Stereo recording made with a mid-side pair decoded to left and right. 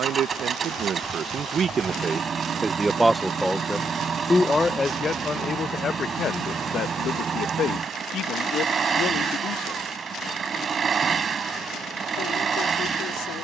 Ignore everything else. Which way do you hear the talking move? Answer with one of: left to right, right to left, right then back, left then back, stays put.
right to left.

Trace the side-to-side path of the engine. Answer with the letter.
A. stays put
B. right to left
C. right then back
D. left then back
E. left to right
A.